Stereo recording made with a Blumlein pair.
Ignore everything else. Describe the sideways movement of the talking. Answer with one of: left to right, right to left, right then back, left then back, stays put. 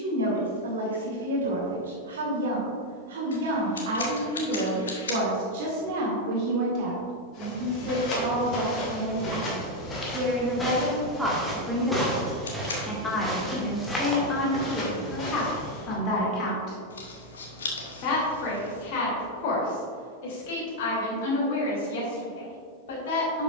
right to left.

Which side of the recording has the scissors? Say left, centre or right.
left.